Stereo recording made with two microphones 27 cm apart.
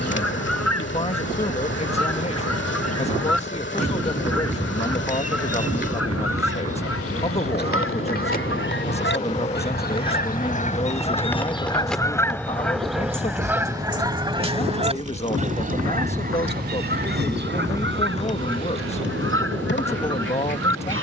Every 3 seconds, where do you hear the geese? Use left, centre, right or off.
left, left, left, left, centre, right, right.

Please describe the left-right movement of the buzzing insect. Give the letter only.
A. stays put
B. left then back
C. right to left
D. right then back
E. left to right
D.